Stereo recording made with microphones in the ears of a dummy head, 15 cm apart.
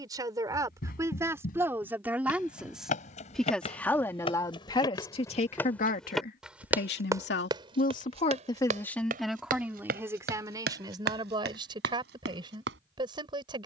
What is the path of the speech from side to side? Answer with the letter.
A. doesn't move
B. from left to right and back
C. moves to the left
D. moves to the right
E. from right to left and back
E.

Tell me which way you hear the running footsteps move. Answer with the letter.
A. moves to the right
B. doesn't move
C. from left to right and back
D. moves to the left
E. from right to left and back
A.